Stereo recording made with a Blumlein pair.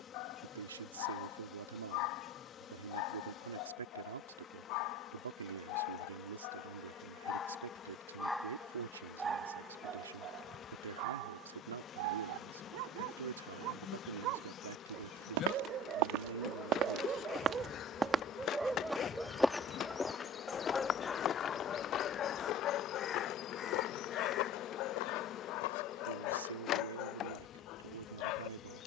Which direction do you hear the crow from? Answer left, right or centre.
left.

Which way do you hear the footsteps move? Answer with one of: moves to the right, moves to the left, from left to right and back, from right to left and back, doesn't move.
moves to the left.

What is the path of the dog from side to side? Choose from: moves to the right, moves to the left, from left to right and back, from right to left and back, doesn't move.
from left to right and back.